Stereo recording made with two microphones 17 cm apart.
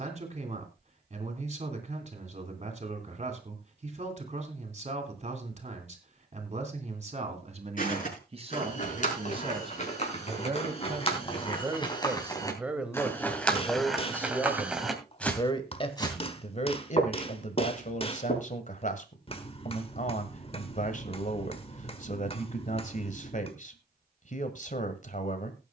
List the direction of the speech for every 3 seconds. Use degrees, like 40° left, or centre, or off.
40° right, 40° right, 40° right, 30° right, centre, 40° left, 50° left, 50° left, 50° left.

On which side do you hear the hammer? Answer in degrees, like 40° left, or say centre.
30° left.